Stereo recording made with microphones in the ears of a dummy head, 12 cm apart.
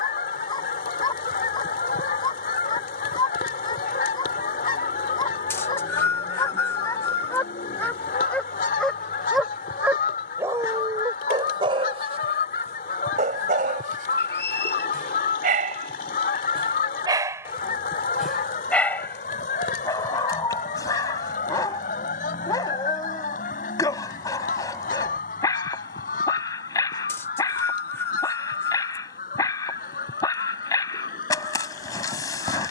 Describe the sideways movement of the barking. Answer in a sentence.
In this clip you hear the barking go right and come back.